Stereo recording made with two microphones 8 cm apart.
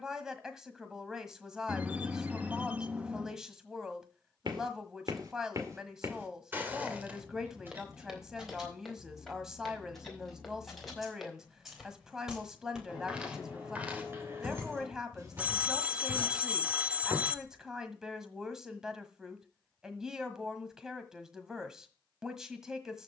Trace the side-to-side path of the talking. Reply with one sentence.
In this clip you hear the talking stay put.